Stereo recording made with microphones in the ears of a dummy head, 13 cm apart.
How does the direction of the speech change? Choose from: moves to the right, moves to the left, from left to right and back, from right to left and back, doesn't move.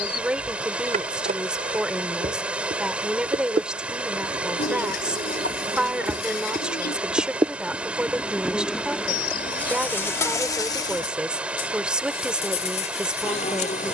doesn't move.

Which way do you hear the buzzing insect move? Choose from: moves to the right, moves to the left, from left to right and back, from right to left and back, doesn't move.
moves to the left.